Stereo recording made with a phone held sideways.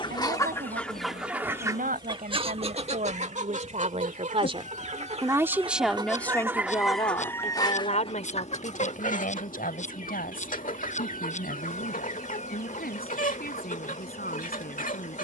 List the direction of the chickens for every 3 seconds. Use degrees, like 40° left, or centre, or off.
10° right, 50° right, 20° left, 60° left, 60° left.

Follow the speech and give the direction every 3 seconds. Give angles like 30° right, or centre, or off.
60° right, 40° right, 40° left, 70° left, 80° left.